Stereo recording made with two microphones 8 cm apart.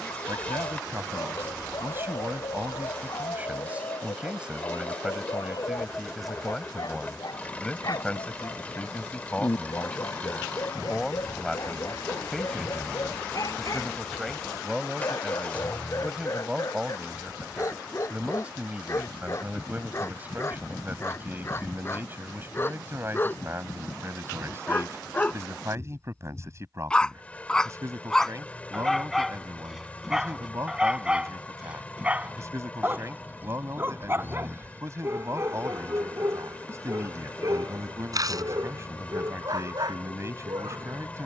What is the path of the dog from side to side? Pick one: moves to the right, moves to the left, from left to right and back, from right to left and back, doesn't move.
moves to the right.